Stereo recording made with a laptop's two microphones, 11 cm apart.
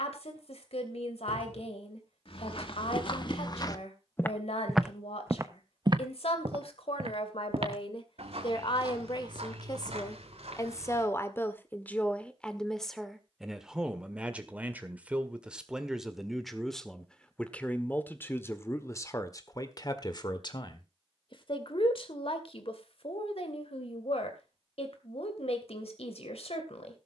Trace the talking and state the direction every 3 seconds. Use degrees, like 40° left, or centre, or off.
70° left, 70° left, 60° left, 30° left, centre, centre, 30° left, 60° left, 70° left.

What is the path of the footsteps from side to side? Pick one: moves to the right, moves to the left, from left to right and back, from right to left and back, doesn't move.
moves to the right.